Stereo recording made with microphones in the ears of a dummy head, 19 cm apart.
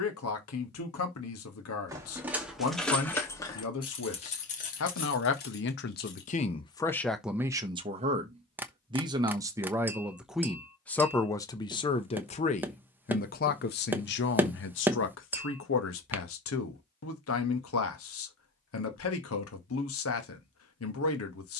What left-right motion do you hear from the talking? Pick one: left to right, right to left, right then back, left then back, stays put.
right then back.